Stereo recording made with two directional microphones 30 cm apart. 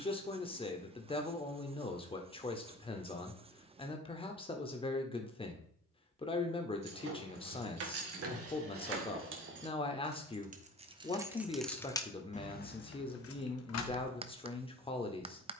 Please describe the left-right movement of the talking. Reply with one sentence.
You can hear the talking stay put.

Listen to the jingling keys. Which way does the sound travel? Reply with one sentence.
In this clip you hear the jingling keys move to the left.